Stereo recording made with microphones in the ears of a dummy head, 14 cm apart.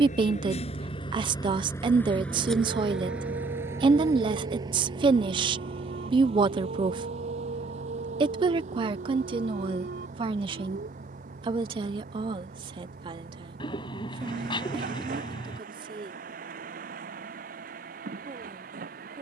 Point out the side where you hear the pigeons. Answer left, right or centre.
left.